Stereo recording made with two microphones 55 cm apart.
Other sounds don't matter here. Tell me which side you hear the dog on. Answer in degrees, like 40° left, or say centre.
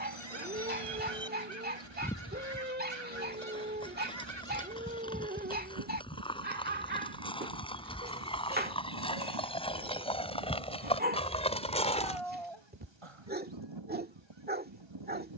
20° right.